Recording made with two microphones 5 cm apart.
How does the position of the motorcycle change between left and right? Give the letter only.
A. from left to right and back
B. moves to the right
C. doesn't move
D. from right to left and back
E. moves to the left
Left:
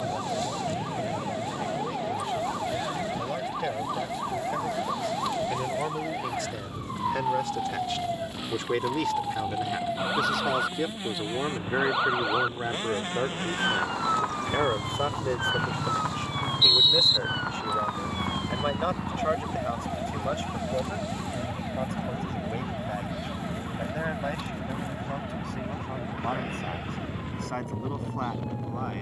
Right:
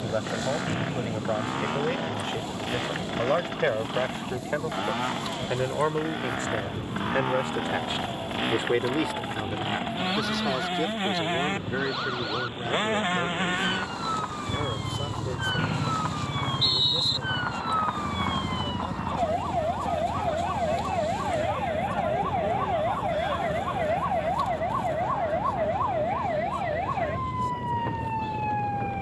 E.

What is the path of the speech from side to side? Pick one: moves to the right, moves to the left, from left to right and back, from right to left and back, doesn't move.
moves to the left.